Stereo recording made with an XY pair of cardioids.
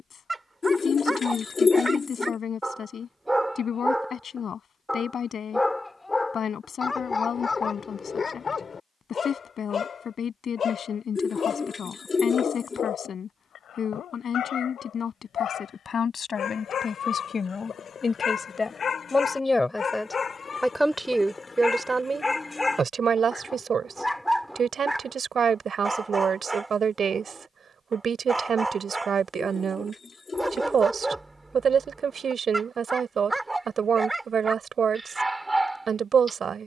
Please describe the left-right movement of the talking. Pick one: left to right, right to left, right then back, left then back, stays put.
left to right.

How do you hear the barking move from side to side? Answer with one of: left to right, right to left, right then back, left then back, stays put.
left then back.